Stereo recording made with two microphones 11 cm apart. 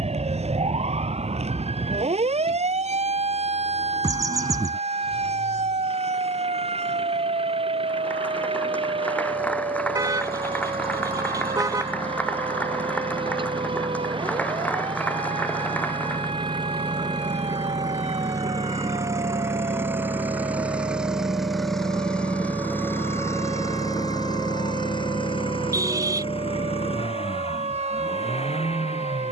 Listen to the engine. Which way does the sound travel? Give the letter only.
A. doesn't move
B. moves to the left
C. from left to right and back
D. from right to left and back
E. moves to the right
B.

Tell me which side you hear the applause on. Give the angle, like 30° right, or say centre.
10° left.